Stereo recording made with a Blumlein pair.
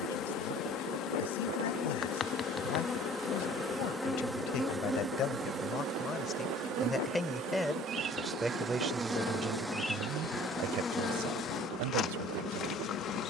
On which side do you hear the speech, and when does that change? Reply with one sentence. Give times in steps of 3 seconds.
You can hear the speech on the left from 0 s, in the centre from 6 s and on the right from 9 s.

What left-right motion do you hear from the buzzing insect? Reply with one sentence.
In this clip you hear the buzzing insect go right and come back.